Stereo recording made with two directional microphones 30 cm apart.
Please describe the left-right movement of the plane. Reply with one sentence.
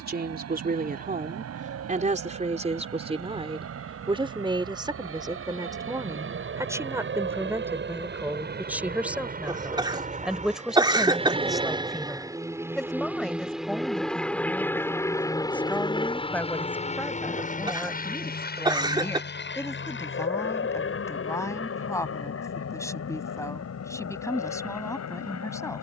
You can hear the plane travel towards the left.